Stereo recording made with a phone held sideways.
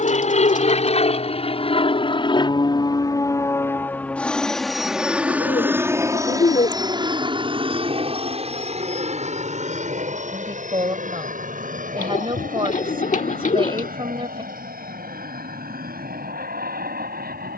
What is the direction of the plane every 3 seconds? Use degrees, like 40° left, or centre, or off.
40° left, centre, 30° right, 50° right, 60° right, 60° right.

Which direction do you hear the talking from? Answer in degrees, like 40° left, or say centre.
40° right.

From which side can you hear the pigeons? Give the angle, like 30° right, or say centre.
60° left.